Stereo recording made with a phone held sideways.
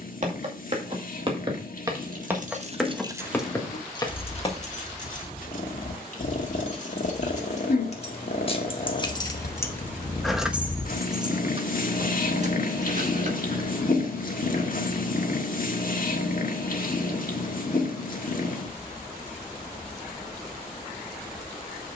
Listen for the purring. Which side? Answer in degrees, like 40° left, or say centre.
60° left.